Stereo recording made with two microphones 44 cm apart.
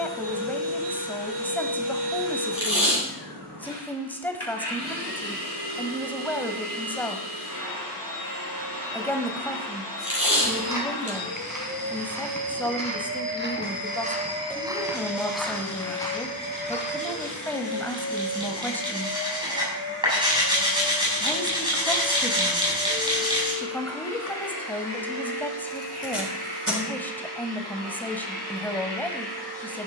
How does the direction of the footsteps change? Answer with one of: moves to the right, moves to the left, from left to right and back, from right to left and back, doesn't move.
moves to the left.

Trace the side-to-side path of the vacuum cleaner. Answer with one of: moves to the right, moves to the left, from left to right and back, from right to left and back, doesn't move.
from right to left and back.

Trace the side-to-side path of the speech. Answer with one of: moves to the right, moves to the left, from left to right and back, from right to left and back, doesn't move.
doesn't move.